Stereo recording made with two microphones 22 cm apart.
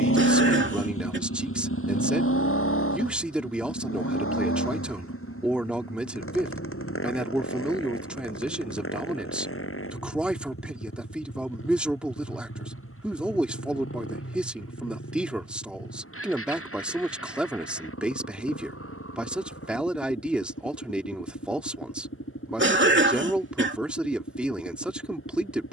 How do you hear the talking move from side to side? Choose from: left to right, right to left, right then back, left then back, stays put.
stays put.